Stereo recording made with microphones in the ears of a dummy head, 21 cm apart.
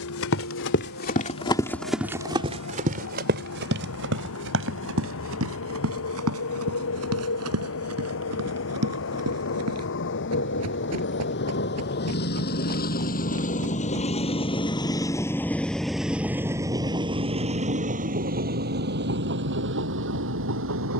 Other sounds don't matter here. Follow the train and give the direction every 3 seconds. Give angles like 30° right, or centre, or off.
70° left, 70° left, 70° left, 60° left, 40° left, 10° right, 50° right.